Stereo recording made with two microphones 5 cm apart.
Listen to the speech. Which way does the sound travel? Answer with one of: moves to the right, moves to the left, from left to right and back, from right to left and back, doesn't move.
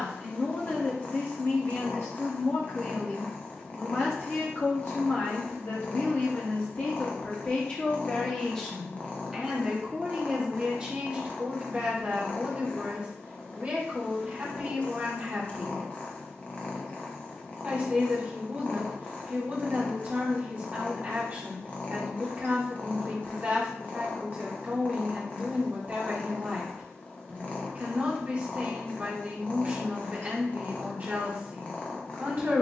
moves to the right.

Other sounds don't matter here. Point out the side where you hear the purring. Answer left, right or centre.
left.